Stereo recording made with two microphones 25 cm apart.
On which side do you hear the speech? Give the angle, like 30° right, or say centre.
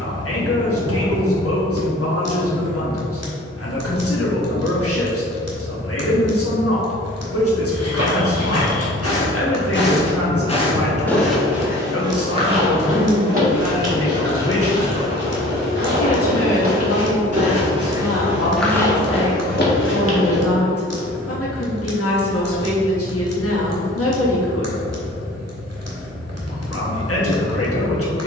60° left.